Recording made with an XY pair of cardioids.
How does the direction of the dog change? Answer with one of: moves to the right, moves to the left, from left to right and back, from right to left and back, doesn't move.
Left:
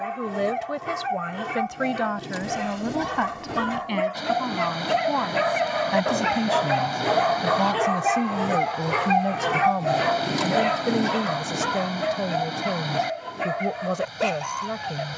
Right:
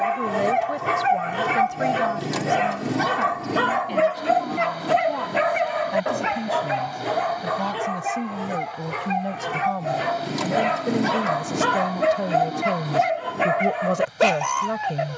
from right to left and back.